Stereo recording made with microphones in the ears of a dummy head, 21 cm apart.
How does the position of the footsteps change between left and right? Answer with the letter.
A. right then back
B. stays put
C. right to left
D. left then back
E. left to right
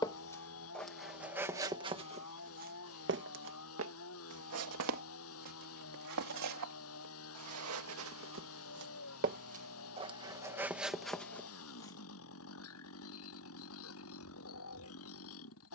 A.